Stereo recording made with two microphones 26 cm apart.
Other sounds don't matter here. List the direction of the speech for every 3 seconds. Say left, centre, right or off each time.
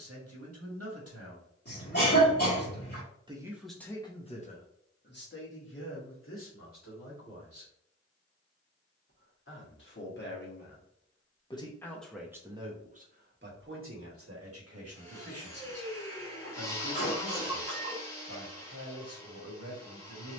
right, left, left, left, right, right, right.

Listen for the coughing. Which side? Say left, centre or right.
left.